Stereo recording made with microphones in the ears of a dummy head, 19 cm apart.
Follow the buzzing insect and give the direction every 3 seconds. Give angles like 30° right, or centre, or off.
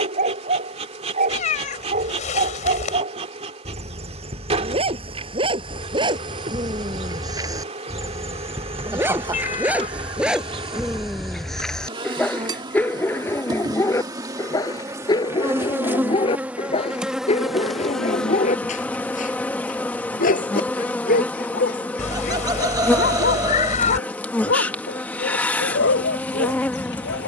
30° right, 30° right, 30° right, 30° right, 20° right, 10° right, 10° left, 10° left, 10° left.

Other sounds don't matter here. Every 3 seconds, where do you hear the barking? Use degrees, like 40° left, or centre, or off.
30° right, 30° right, 20° right, centre, 10° left, 30° left, 40° left, 50° left, 50° left.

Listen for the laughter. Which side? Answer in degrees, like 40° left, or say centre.
20° right.